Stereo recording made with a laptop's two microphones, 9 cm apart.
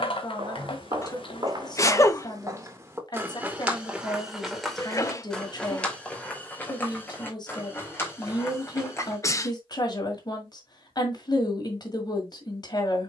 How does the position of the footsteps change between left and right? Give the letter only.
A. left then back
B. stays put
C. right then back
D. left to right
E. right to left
E.